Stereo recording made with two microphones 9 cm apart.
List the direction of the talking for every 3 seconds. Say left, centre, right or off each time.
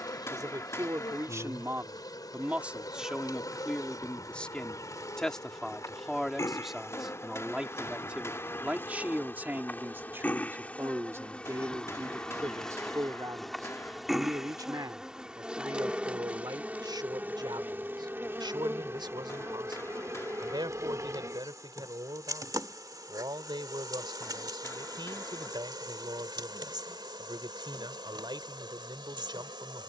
right, centre, centre, right, right, right, right, right, right, right.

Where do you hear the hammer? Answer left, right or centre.
left.